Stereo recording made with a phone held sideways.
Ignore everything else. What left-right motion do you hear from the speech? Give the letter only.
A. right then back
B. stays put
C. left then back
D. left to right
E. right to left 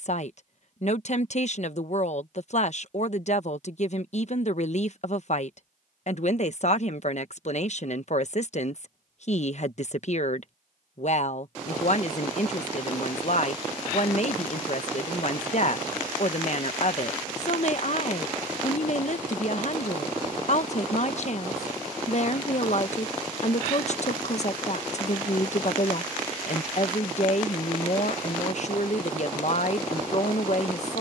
B.